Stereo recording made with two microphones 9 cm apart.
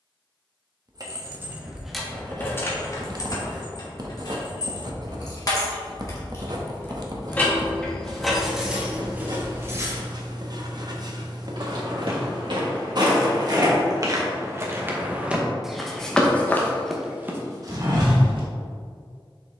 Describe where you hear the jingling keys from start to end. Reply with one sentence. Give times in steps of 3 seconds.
You can hear the jingling keys in the centre from 0 s, on the left from 3 s, in the centre from 6 s, on the right from 9 s and not at all from 12 s.